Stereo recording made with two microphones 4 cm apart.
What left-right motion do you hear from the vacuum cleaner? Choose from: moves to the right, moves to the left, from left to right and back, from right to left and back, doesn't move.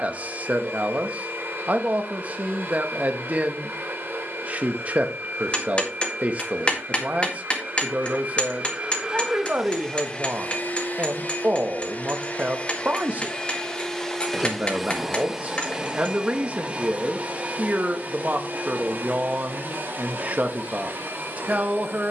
from right to left and back.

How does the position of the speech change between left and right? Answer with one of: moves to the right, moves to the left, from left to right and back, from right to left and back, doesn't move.
doesn't move.